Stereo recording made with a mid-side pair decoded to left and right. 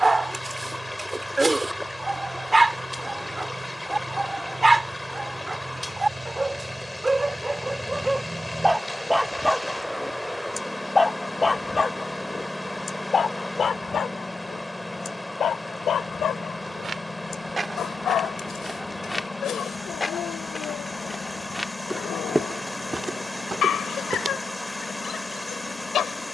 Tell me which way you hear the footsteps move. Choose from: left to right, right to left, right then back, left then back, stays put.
left then back.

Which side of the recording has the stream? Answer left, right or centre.
centre.